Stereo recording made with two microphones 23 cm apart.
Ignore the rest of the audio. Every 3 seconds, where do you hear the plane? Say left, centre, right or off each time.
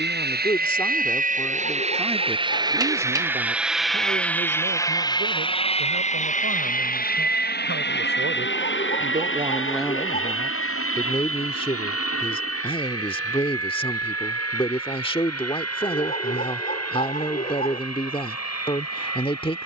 right, centre, left, left, left, left, left.